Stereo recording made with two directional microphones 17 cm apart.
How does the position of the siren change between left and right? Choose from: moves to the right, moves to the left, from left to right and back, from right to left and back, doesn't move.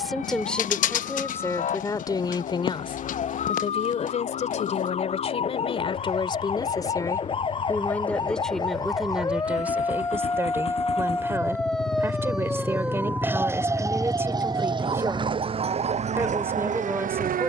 moves to the right.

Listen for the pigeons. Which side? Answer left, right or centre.
left.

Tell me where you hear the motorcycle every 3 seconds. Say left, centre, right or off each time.
left, left, left, left, centre, right.